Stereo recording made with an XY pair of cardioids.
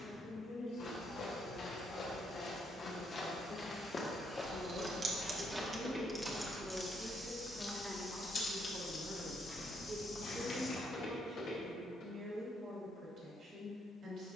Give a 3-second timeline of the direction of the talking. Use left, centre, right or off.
left, left, centre, right, right.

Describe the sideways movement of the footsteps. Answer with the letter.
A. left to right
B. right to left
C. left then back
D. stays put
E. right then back
E.